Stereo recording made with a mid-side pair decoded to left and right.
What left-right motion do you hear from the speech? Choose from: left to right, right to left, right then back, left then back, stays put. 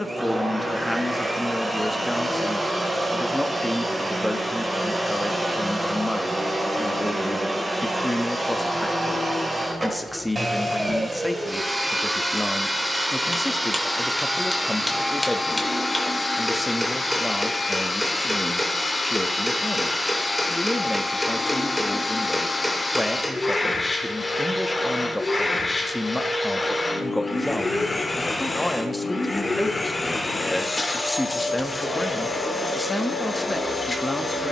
stays put.